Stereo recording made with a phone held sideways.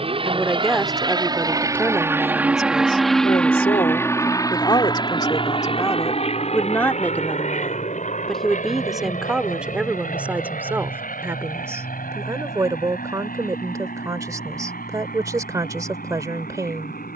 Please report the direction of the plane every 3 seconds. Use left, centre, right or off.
right, left, left, left, left, left.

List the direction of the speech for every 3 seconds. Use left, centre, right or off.
centre, left, centre, centre, right, right.